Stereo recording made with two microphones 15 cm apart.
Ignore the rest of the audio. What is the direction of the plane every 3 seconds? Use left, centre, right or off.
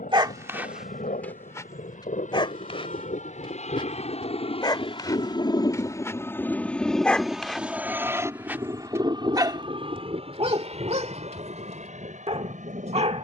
left, left, centre, right, right.